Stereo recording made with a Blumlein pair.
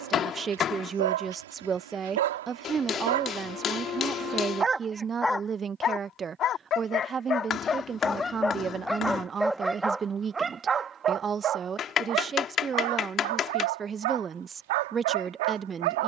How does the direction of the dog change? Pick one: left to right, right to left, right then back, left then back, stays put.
left then back.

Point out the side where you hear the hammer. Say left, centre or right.
left.